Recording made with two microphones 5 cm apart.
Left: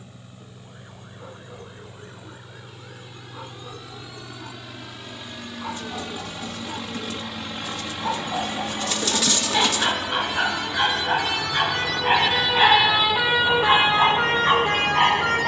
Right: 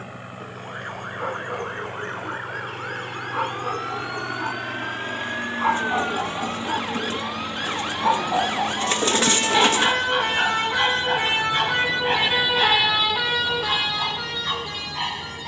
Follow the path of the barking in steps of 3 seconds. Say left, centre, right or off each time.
right, right, right, centre, left.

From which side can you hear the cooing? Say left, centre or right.
right.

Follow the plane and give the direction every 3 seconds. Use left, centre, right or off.
right, right, centre, left, left.